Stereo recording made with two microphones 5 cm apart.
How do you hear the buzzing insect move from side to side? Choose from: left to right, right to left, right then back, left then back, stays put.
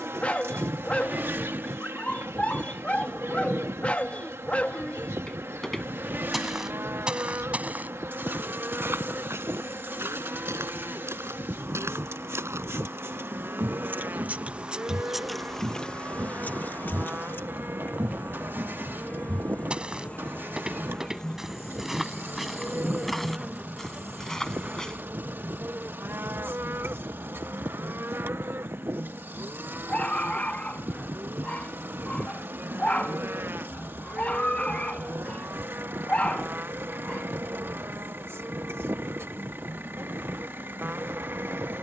left then back.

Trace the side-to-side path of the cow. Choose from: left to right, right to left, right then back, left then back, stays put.
stays put.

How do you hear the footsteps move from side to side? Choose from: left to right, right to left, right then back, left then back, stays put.
right then back.